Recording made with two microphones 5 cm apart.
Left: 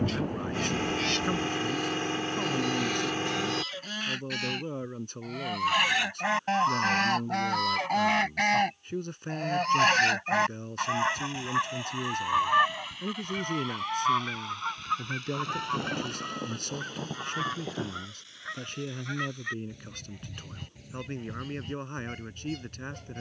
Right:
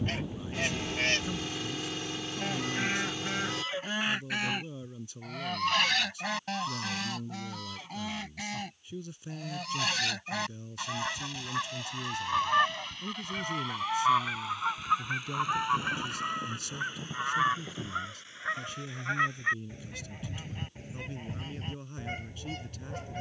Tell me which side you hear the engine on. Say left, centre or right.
left.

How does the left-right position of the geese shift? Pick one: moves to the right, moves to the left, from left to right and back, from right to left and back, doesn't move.
from right to left and back.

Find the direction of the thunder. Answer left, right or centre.
left.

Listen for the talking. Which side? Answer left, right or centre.
left.